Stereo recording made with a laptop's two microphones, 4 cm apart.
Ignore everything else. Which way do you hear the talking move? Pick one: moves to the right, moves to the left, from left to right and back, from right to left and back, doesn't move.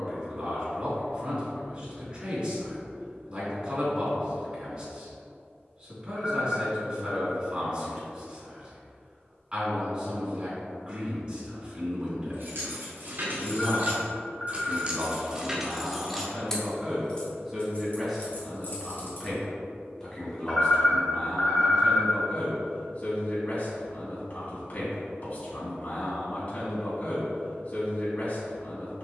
moves to the left.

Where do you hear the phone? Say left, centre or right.
left.